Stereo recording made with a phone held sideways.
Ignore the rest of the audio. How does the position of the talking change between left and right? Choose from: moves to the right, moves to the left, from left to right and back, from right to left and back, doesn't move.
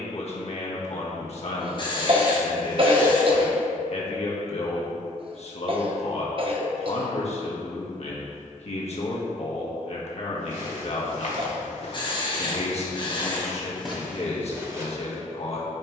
doesn't move.